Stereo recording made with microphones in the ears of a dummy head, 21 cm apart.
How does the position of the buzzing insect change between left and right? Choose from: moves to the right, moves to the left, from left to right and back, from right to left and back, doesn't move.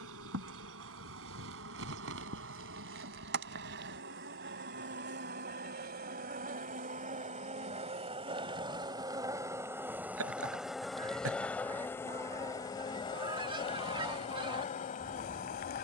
moves to the left.